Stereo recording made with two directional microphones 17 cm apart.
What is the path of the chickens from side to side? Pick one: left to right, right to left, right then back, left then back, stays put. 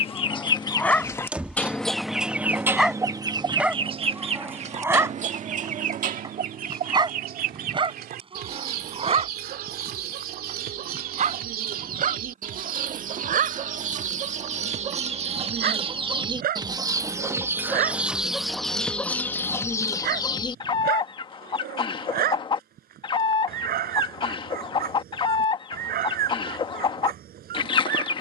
right then back.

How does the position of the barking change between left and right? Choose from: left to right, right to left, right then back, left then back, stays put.
left to right.